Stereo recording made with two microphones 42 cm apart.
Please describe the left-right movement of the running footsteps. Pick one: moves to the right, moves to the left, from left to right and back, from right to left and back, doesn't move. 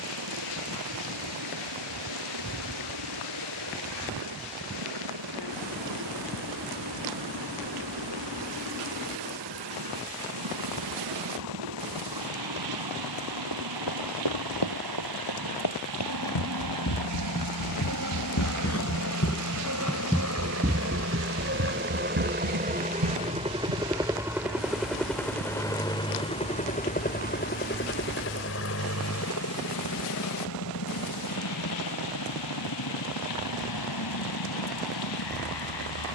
moves to the right.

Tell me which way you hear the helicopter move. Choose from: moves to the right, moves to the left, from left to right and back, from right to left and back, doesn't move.
moves to the left.